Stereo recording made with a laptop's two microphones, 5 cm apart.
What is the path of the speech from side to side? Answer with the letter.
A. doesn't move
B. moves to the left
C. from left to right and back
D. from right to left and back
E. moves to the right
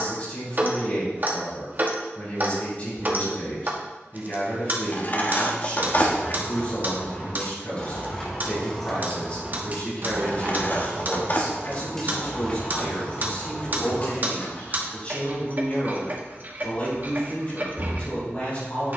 A.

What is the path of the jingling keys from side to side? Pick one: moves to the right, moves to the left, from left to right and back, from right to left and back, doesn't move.
from left to right and back.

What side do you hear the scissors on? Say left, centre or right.
left.